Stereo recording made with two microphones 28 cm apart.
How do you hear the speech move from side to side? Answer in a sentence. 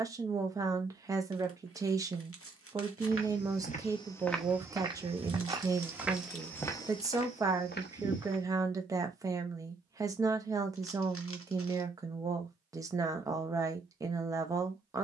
You can hear the speech stay put.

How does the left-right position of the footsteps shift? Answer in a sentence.
In this clip you hear the footsteps move from left to right and back again.